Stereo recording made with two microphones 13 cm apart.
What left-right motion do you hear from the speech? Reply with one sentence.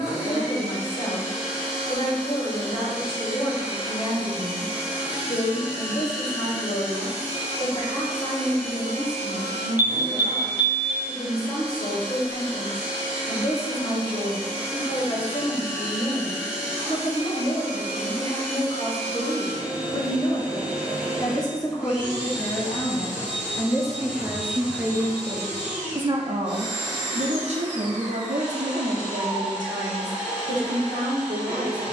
In this clip you hear the speech go from the left side to the right.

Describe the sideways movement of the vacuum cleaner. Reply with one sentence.
In this clip you hear the vacuum cleaner stay in one place.